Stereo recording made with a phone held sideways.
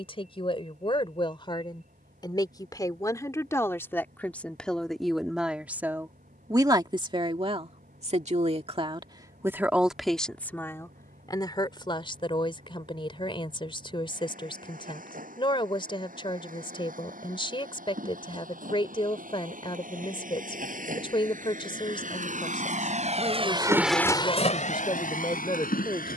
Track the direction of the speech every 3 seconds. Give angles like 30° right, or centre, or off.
40° left, 10° left, 40° right, 10° left, 40° left, 40° left, 40° left, 40° left, 40° left.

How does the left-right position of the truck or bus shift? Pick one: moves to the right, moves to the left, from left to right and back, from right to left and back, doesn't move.
moves to the left.